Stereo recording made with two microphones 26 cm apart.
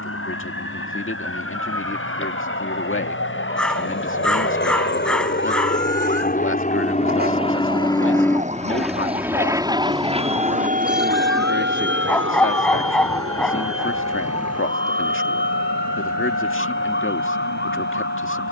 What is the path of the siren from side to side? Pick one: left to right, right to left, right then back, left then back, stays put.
right to left.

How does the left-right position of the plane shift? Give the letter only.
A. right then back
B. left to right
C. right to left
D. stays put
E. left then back
B.